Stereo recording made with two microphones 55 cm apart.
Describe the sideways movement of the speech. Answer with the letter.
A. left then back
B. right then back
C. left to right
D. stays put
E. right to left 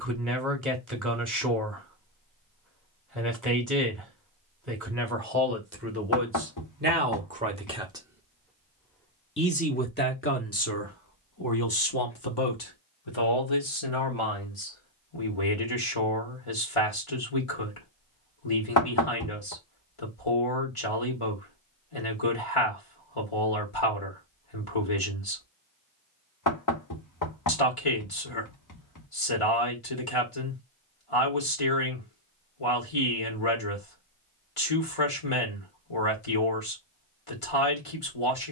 E.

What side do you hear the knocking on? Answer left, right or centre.
left.